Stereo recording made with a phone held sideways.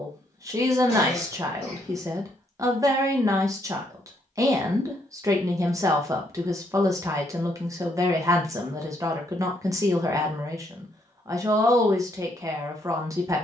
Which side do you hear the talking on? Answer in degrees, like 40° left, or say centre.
20° right.